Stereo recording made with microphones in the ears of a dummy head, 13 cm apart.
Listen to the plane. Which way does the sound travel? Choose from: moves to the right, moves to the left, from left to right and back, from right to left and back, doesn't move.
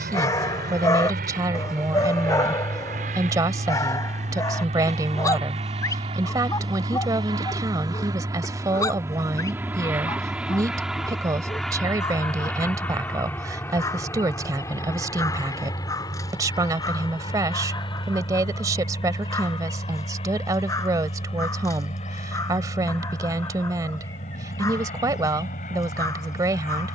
moves to the left.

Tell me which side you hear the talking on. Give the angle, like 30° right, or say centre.
20° right.